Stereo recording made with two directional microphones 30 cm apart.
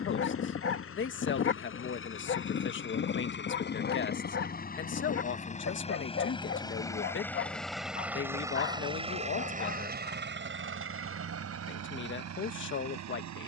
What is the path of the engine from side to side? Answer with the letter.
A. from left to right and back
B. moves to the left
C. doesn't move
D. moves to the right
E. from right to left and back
D.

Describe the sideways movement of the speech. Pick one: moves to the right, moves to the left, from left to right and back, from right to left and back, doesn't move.
doesn't move.